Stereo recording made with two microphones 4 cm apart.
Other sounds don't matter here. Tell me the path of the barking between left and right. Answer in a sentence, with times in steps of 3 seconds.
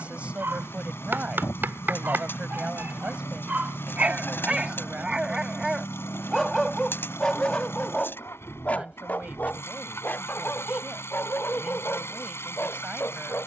In this clip you hear the barking on the right from 0 s and on the left from 6 s.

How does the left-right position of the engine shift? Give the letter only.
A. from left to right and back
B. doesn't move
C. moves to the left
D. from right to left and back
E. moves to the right
B.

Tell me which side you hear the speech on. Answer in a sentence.
You can hear the speech on the right.